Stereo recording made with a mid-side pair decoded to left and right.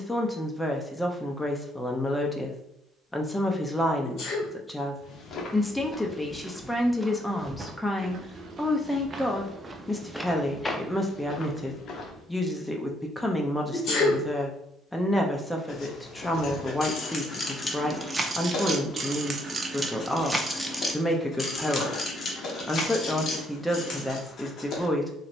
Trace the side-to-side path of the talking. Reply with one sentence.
You can hear the talking stay put.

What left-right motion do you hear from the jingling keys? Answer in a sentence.
In this clip you hear the jingling keys go right and come back.